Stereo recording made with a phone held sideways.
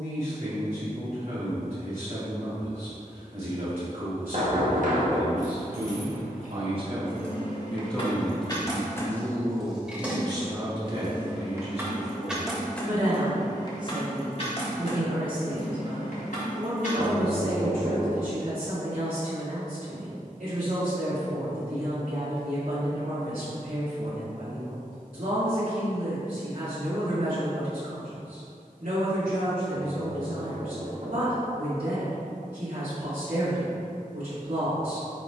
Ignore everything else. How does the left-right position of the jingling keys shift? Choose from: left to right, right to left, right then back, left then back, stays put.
right then back.